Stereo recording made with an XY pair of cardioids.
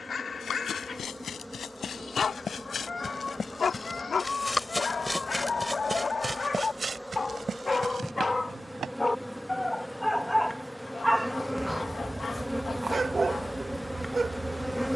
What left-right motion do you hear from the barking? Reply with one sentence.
You can hear the barking go from the left side to the right.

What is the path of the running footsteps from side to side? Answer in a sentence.
You can hear the running footsteps move from left to right.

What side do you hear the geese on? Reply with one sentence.
You can hear the geese on the left.